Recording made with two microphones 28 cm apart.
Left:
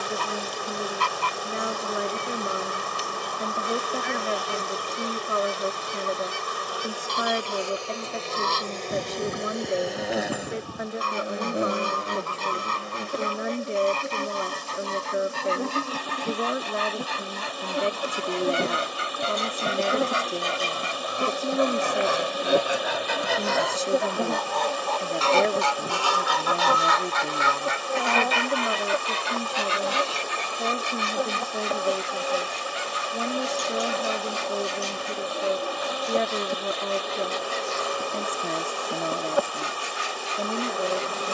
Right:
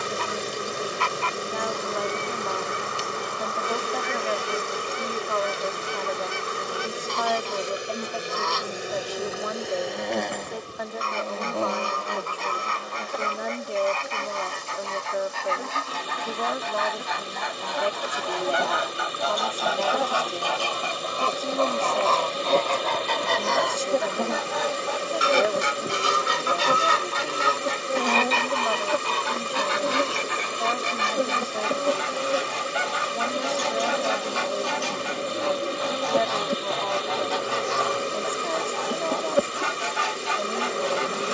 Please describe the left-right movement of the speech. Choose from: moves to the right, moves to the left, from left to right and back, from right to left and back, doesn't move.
doesn't move.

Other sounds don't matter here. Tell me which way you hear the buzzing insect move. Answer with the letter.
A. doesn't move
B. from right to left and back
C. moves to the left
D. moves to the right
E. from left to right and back
B.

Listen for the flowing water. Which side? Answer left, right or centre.
right.